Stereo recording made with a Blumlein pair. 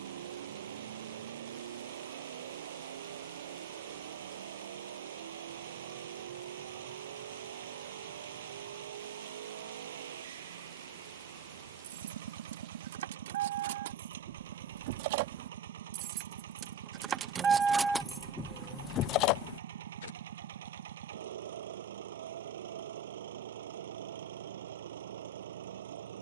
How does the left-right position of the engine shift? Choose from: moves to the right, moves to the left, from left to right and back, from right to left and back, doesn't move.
doesn't move.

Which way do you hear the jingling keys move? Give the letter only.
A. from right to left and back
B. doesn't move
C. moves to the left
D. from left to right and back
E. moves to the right
C.